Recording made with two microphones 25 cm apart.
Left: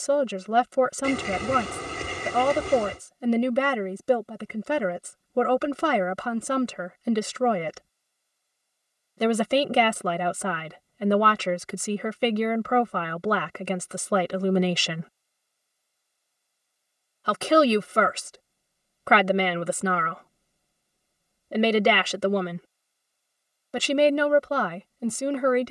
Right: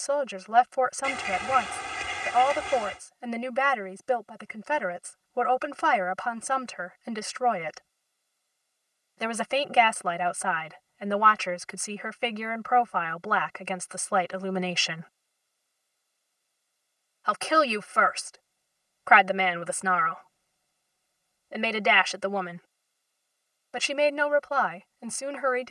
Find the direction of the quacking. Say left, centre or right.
left.